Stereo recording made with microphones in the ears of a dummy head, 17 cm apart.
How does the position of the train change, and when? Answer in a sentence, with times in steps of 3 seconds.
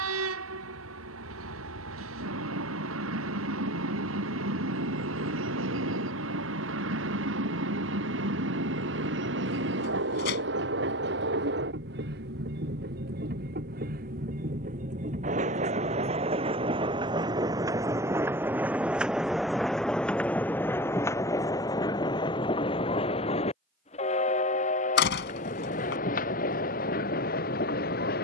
In this clip you hear the train on the right from 0 s, in the centre from 18 s and on the left from 21 s.